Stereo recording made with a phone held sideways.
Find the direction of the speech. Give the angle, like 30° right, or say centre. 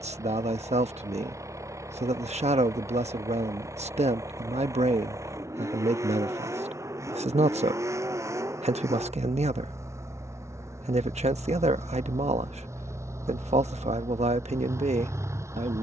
50° right.